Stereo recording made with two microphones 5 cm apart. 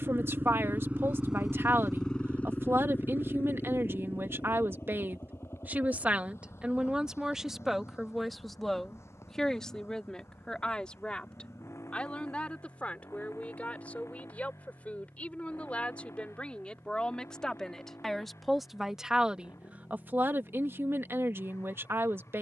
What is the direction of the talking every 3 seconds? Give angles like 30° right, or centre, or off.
60° right, 50° right, 10° right, 20° left, 30° left, 20° left, 20° right, 60° right.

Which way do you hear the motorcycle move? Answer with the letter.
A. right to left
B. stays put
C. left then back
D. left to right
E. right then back
A.